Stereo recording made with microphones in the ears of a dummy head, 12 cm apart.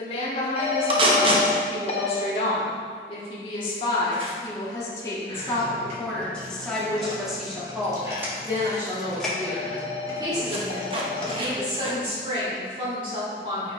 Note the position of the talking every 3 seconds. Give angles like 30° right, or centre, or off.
40° left, 30° left, centre, 30° right, 40° right.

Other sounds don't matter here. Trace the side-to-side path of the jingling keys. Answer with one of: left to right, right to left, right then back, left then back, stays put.
right to left.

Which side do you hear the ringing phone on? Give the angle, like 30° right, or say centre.
40° left.